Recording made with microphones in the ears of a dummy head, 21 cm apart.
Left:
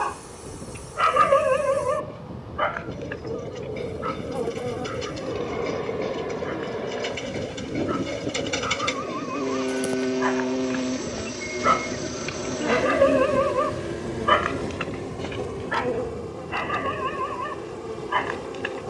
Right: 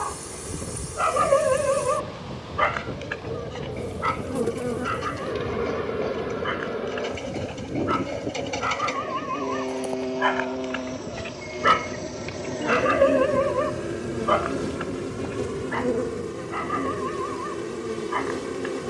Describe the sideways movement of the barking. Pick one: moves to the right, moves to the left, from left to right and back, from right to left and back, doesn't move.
from left to right and back.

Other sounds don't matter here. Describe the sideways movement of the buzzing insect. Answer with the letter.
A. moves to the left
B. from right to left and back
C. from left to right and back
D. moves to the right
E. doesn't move
B.